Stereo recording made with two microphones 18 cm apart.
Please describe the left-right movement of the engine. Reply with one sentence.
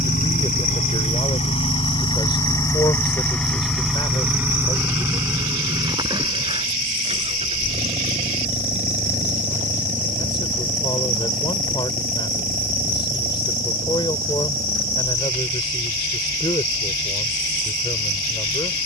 You can hear the engine go from the left side to the right.